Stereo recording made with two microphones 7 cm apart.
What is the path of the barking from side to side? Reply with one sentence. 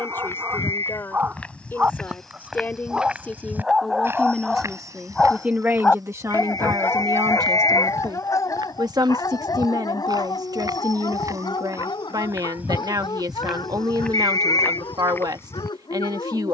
In this clip you hear the barking move to the left.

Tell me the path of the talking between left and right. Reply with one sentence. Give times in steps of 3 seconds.
In this clip you hear the talking on the left from 0 s, in the centre from 3 s and on the right from 6 s.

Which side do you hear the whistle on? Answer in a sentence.
You can hear the whistle on the left.